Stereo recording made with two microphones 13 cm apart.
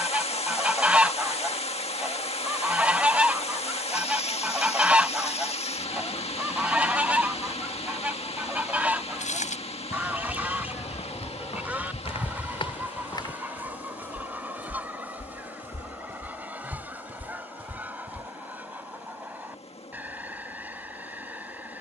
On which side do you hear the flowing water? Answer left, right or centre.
left.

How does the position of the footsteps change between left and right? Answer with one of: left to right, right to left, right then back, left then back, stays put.
left to right.